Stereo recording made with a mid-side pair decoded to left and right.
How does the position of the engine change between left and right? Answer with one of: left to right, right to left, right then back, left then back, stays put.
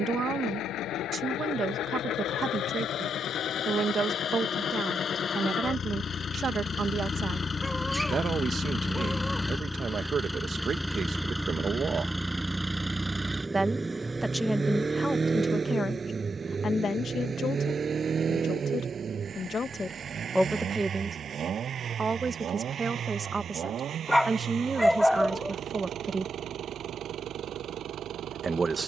left to right.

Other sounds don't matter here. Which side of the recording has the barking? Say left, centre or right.
centre.